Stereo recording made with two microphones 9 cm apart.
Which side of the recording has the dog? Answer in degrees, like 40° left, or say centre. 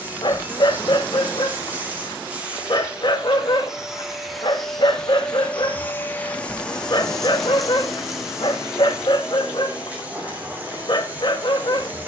60° left.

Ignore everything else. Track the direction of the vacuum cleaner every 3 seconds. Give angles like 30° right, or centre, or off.
20° right, centre, centre, 20° right.